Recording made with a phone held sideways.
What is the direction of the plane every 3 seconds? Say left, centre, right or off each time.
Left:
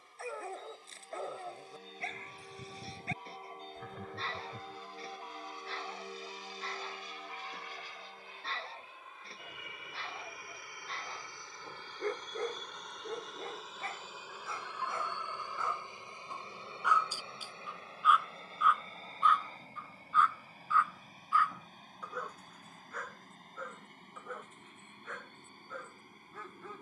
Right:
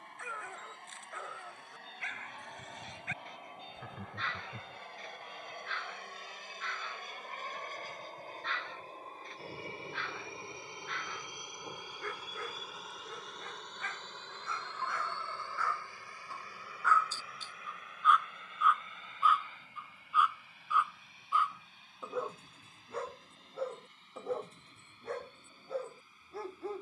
right, right, right, right, centre, left, left, left, left.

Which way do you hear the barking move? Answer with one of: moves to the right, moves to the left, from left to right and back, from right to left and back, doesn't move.
moves to the right.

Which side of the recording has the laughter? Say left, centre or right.
centre.